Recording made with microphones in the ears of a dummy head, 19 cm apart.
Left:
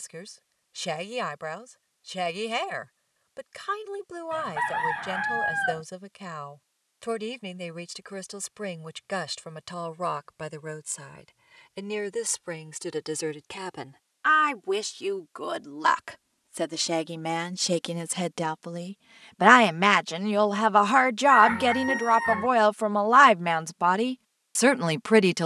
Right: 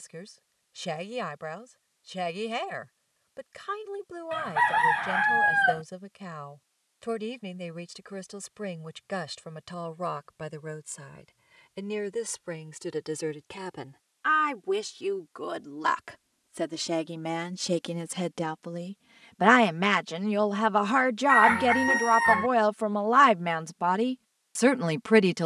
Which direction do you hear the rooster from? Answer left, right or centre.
right.